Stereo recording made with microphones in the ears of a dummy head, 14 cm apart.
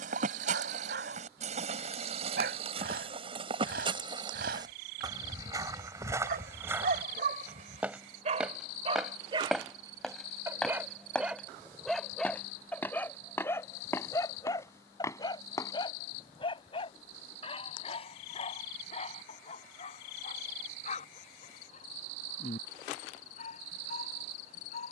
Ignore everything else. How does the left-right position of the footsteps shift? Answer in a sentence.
You can hear the footsteps move to the left.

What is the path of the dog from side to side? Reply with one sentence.
You can hear the dog move to the left.